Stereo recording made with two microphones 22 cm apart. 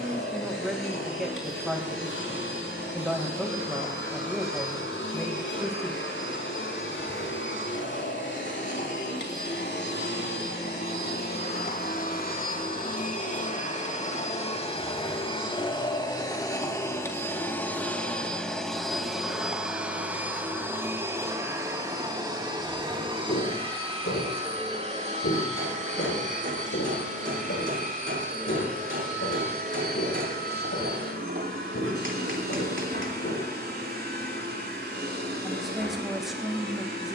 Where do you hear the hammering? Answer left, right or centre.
right.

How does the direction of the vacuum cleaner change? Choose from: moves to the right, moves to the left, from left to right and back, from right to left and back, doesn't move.
moves to the right.